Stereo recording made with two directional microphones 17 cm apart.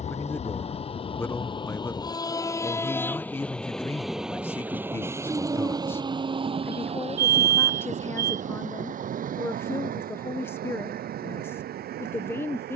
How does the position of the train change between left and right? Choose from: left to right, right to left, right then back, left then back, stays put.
left to right.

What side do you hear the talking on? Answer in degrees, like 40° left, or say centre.
10° left.